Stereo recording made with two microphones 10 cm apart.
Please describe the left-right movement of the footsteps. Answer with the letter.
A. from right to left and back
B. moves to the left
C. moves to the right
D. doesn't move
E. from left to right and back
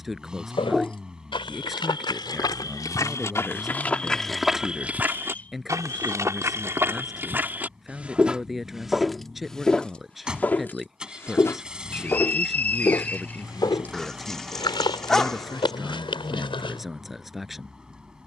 E.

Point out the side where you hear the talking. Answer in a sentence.
You can hear the talking in the centre.